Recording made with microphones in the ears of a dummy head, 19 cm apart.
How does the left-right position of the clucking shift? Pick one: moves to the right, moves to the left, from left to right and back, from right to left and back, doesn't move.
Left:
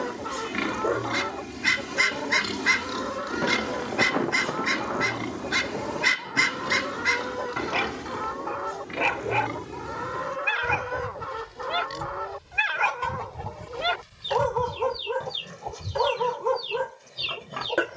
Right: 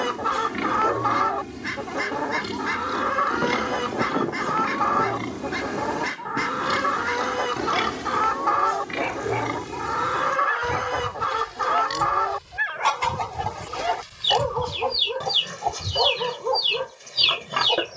doesn't move.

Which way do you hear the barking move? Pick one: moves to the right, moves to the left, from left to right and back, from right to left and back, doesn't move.
doesn't move.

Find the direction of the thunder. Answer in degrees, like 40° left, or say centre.
40° left.